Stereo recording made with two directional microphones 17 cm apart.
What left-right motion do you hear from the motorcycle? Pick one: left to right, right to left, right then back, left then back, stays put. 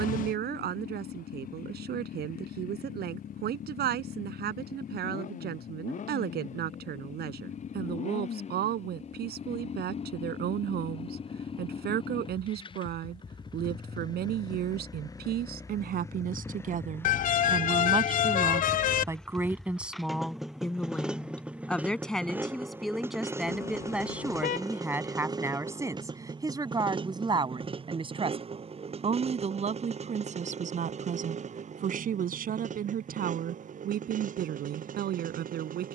left to right.